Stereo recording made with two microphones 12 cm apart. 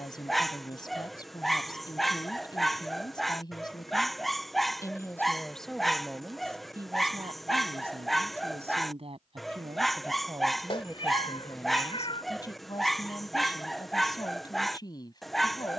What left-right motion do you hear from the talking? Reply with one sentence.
You can hear the talking move from left to right and back again.